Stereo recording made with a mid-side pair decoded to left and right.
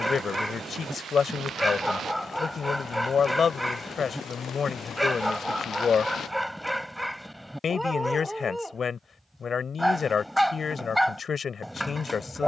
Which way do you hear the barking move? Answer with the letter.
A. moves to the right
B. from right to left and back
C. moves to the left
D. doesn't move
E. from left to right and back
D.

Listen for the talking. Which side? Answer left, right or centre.
left.